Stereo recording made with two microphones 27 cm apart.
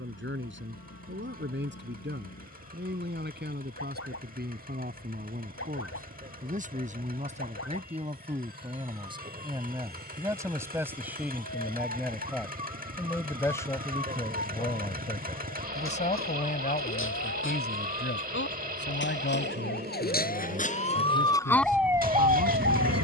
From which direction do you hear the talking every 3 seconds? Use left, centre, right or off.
right, right, right, centre, centre, left, left, left.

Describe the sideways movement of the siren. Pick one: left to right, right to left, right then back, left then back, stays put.
left to right.